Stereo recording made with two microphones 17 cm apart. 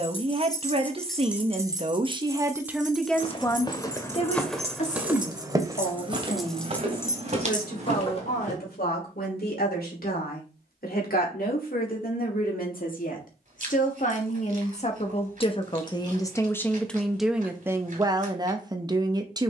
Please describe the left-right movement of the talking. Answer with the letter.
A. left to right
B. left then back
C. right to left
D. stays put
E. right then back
B.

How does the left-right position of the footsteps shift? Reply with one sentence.
In this clip you hear the footsteps go from the left side to the right.